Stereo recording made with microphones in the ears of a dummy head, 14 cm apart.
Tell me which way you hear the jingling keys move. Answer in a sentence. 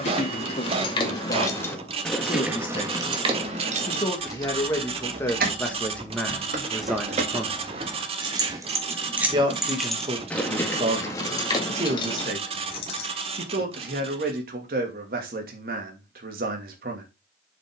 In this clip you hear the jingling keys go right and come back.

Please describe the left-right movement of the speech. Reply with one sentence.
You can hear the speech travel towards the right.